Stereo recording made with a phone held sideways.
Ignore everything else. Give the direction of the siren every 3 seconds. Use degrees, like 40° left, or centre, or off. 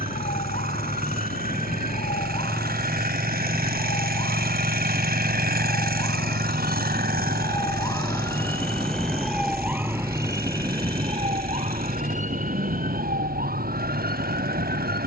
50° left, 50° left, 20° left, 20° right, 60° right.